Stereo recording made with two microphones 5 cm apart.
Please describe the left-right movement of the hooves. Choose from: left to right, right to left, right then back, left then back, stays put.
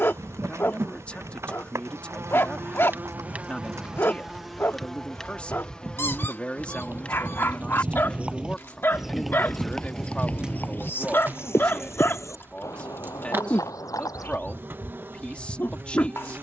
right to left.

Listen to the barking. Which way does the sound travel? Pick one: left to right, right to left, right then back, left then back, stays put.
stays put.